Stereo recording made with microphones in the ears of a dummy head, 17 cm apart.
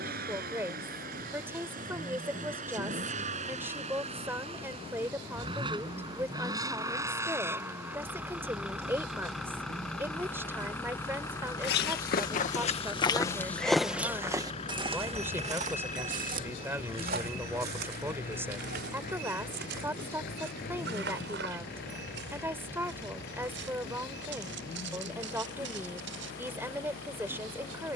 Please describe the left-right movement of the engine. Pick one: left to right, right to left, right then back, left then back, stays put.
right to left.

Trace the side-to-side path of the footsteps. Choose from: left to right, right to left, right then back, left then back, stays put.
left to right.